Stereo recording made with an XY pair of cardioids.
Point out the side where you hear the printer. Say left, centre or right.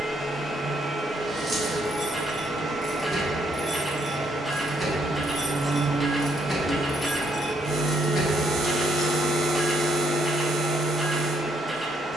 centre.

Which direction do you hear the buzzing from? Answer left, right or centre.
right.